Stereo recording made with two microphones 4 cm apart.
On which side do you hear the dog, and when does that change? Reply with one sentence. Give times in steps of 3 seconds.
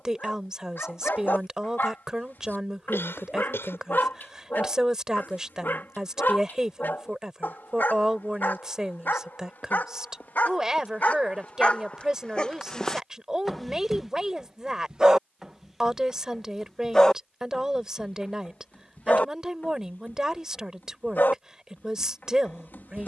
In this clip you hear the dog on the left from 0 s, in the centre from 12 s and on the left from 18 s.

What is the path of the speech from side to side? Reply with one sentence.
You can hear the speech stay put.